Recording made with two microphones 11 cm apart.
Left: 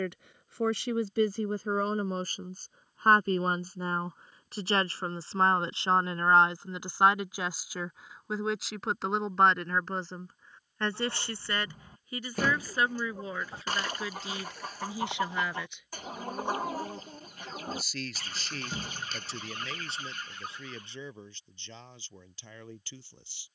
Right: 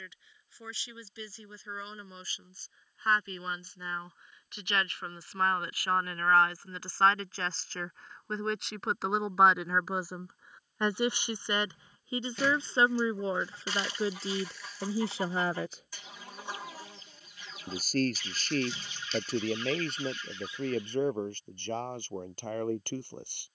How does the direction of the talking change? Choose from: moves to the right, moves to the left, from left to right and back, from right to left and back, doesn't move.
moves to the right.